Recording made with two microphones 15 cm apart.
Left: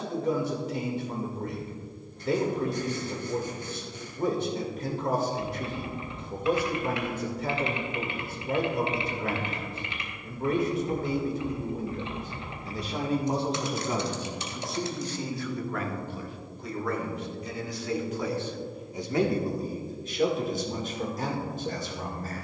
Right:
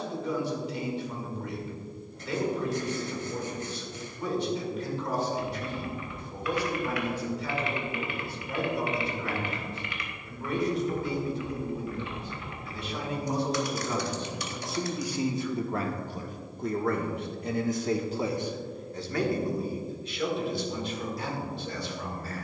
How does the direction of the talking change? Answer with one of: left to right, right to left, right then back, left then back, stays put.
right then back.